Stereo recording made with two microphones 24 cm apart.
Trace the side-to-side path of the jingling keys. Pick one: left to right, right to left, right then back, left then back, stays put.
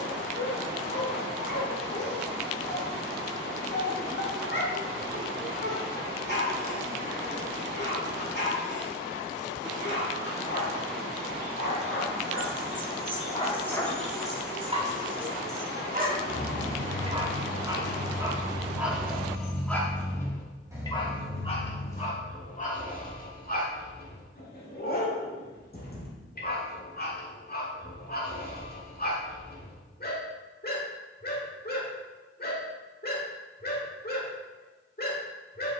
right then back.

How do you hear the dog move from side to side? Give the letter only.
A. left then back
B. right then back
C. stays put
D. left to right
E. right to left
B.